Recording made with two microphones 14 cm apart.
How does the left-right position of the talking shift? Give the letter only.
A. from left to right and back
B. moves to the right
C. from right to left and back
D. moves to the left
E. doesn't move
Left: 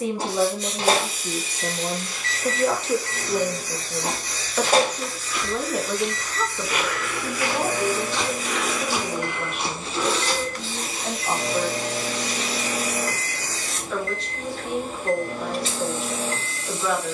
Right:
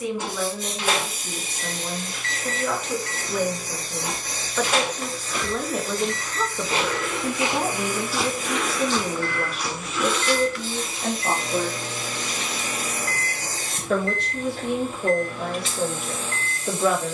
B.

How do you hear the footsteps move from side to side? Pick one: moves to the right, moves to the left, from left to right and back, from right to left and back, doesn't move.
moves to the left.